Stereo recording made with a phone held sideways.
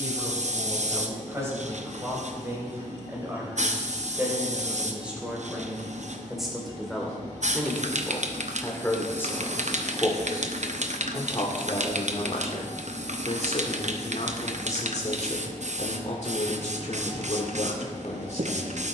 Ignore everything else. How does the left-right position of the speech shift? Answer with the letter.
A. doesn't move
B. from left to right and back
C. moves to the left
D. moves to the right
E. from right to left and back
C.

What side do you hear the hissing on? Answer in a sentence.
You can hear the hissing on the right.